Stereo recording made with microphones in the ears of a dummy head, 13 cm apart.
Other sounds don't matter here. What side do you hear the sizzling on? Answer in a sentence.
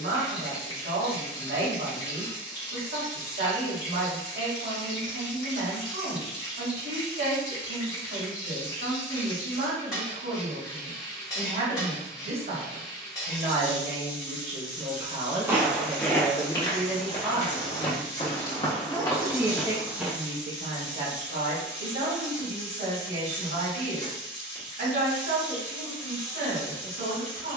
In this clip you hear the sizzling on the left.